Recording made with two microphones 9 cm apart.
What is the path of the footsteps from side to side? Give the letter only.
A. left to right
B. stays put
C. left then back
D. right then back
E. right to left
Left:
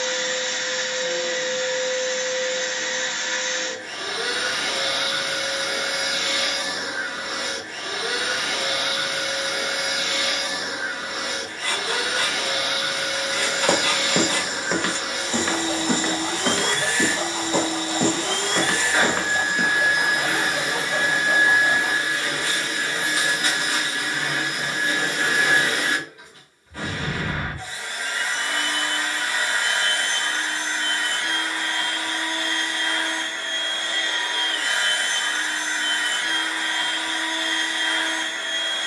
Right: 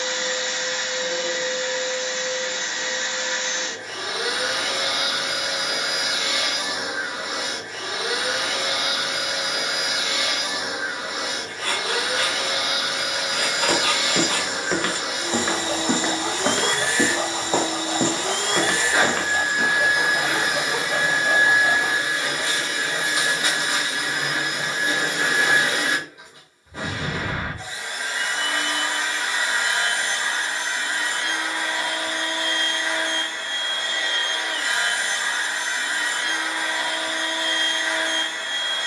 D.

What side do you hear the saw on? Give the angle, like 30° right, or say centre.
50° right.